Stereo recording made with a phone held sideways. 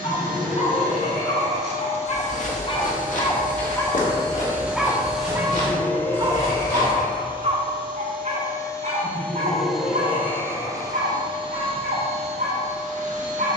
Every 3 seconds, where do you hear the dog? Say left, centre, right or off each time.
left, centre, right, right, right.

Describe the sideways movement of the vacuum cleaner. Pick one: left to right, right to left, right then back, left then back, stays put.
left then back.